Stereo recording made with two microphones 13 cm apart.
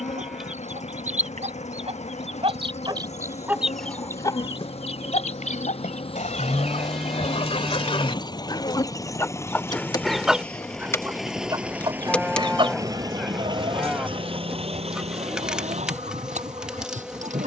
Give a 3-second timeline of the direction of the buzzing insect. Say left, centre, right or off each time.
left, left, left, left, centre, centre.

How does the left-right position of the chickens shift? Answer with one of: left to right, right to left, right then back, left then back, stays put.
left then back.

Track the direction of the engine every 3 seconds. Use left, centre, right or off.
left, left, left, centre, right, right.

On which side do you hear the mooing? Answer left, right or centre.
centre.